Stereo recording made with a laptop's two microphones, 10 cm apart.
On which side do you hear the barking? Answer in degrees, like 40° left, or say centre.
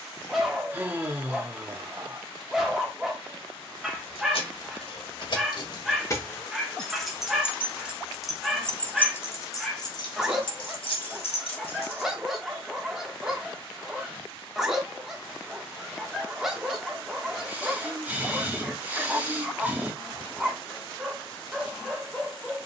centre.